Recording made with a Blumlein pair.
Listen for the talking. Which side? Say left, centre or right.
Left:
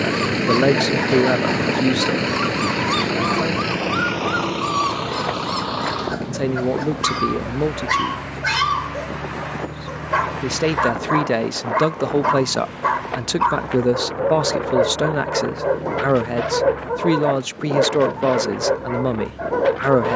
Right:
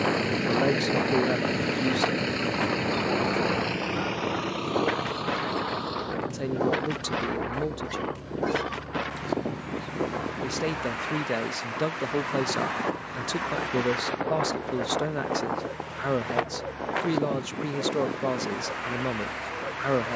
left.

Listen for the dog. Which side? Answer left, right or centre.
left.